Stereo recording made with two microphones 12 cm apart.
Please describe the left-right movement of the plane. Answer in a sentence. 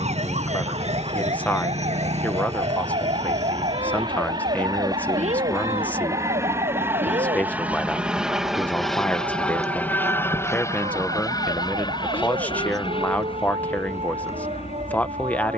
You can hear the plane move from right to left.